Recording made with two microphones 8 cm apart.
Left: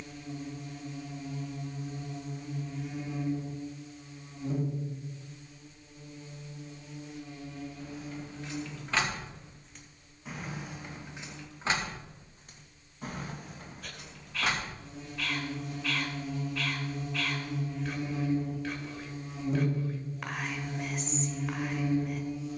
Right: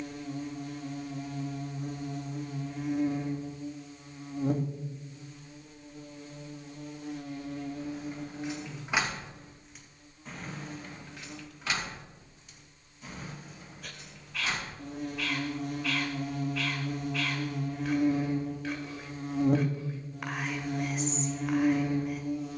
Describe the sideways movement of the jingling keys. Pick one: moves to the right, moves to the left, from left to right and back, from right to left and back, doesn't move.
moves to the left.